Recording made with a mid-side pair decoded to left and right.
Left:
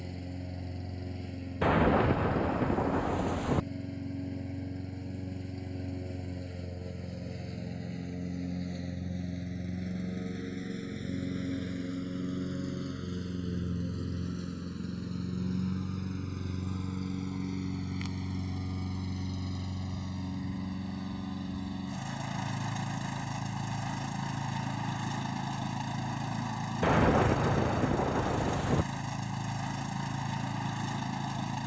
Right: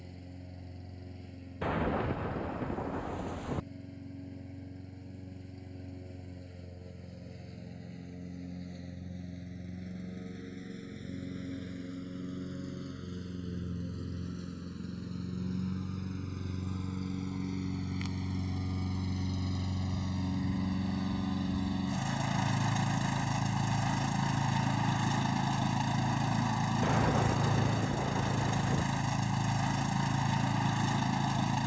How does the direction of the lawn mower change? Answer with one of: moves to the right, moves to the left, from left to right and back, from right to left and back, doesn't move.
moves to the right.